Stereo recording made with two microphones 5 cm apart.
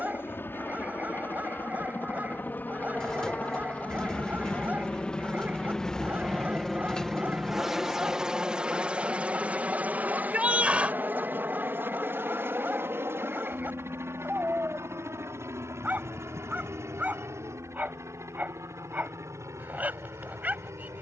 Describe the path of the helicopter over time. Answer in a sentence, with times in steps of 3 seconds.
In this clip you hear the helicopter on the left from 0 s, in the centre from 6 s and on the right from 9 s.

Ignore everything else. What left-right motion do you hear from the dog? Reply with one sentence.
You can hear the dog stay in one place.